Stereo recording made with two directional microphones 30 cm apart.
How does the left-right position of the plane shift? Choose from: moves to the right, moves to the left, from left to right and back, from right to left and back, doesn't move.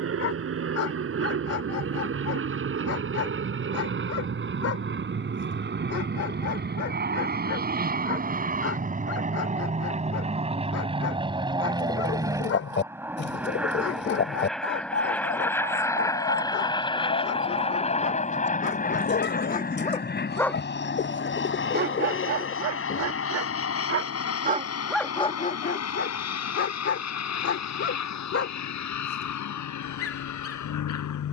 moves to the left.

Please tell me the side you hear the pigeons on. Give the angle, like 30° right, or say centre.
40° left.